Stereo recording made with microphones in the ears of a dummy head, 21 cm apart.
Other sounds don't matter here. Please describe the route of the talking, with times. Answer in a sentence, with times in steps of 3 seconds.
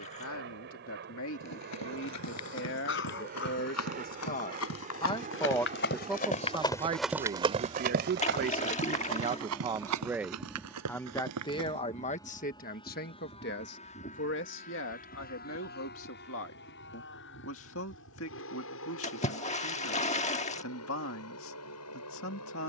You can hear the talking on the left from 0 s, on the right from 6 s, in the centre from 9 s and on the left from 12 s.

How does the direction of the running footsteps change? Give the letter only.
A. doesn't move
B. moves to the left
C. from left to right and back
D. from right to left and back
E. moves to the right
E.